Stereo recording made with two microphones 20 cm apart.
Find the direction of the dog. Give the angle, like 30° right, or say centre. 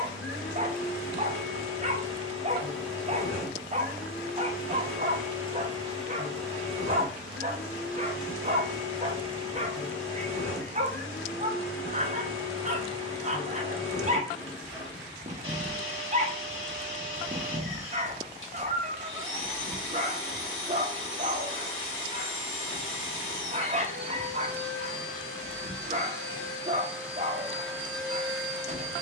30° right.